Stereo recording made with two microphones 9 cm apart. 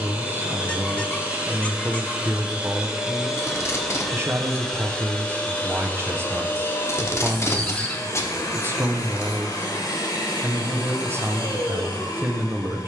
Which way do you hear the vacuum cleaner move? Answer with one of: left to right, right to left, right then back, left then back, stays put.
right to left.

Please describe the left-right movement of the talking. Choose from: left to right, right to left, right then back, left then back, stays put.
stays put.